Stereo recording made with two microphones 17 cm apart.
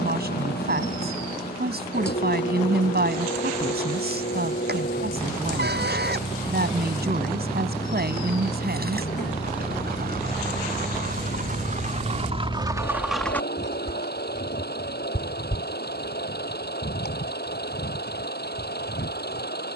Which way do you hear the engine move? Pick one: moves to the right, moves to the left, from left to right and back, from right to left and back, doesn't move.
doesn't move.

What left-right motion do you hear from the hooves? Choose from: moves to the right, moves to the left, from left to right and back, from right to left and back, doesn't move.
moves to the left.